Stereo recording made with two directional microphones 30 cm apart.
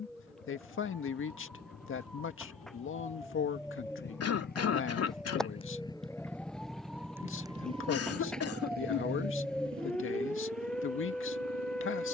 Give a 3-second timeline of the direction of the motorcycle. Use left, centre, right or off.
left, left, centre, right.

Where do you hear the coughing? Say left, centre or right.
left.